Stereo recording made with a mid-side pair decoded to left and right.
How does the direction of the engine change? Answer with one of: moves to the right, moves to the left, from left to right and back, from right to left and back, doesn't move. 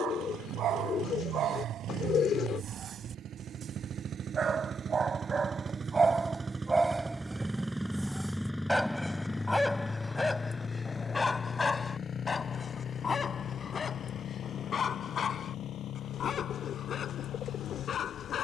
moves to the left.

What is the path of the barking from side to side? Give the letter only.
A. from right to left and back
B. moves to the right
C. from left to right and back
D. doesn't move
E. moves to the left
E.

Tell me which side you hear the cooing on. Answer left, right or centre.
left.